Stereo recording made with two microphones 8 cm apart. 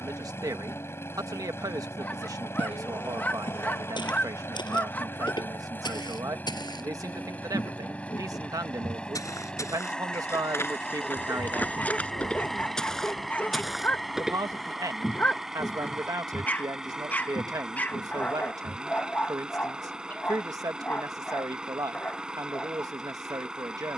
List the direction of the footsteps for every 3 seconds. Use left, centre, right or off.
off, left, left, left, centre, left, left, off.